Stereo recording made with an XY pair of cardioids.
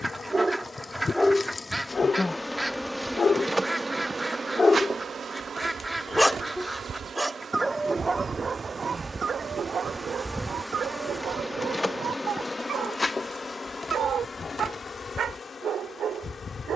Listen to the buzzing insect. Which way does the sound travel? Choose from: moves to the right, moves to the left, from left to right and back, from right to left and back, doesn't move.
from left to right and back.